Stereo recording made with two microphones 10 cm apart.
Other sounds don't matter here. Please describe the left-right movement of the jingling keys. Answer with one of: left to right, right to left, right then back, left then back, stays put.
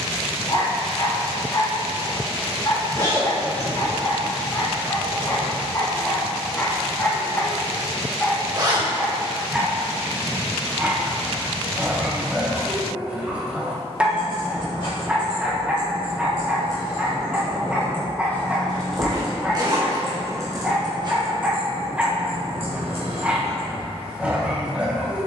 left to right.